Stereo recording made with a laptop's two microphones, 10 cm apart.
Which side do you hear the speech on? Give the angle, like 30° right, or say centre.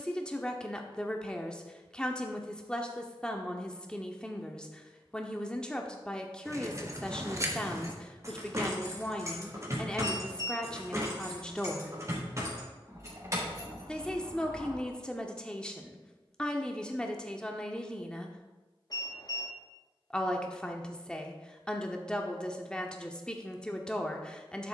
10° left.